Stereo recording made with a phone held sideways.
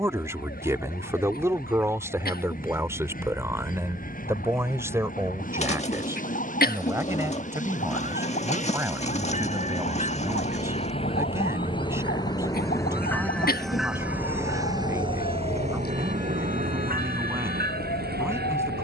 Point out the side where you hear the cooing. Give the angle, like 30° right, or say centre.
40° left.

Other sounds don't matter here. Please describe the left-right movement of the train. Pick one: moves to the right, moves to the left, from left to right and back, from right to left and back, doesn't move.
moves to the right.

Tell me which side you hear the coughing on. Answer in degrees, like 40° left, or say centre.
70° left.